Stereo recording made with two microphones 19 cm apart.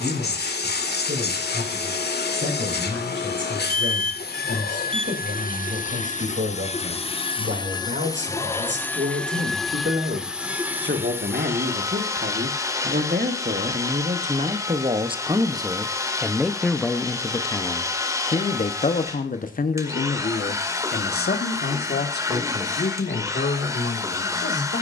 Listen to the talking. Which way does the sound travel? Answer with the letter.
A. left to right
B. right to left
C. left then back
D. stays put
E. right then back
B.